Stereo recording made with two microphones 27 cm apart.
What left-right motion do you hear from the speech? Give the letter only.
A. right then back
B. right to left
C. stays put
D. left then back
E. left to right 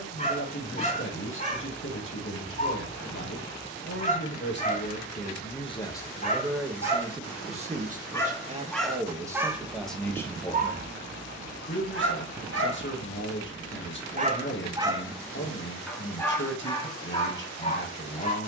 A.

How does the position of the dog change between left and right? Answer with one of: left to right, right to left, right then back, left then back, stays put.
right then back.